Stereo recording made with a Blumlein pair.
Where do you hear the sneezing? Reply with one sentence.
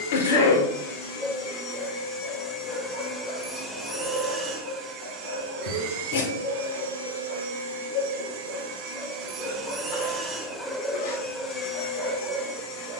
You can hear the sneezing on the left.